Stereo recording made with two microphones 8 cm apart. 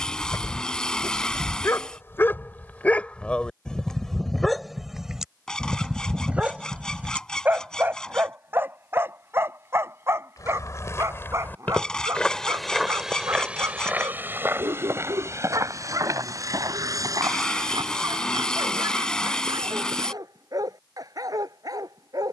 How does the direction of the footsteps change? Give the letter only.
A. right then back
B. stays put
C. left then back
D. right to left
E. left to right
E.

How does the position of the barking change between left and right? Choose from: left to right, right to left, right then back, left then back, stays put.
left to right.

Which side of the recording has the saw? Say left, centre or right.
centre.